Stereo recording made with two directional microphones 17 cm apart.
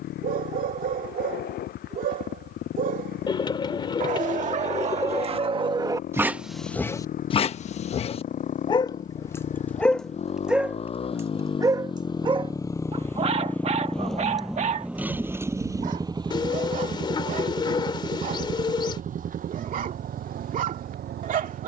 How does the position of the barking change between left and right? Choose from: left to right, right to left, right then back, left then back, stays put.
left then back.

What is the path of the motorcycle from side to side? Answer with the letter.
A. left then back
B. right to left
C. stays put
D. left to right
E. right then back
D.